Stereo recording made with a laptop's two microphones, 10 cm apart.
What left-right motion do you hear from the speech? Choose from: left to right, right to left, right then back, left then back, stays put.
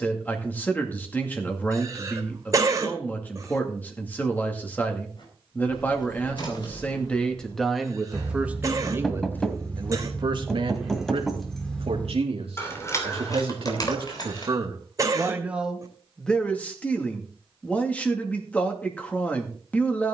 right then back.